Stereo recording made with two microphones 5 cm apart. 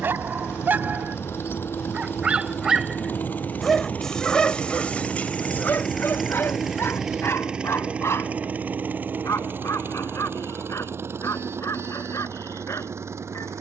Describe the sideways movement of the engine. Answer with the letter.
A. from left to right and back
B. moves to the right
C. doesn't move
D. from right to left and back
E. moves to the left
B.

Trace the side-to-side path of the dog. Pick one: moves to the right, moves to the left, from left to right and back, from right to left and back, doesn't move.
moves to the left.